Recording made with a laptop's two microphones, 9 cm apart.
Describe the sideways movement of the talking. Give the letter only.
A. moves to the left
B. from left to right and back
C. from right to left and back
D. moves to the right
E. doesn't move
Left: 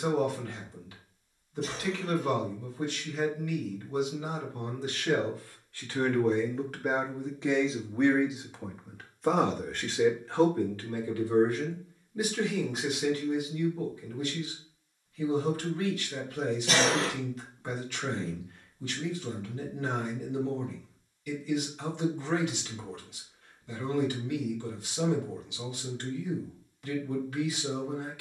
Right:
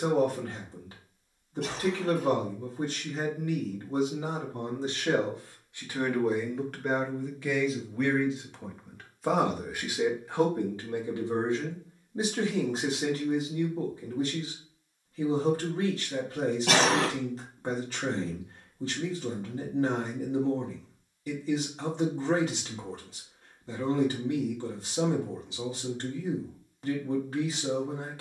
C.